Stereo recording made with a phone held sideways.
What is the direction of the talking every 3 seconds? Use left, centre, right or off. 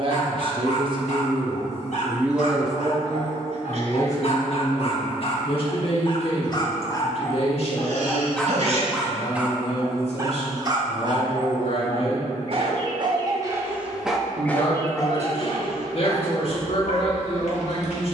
right, left, left, left, left, left.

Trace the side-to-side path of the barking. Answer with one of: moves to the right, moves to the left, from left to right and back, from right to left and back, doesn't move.
from left to right and back.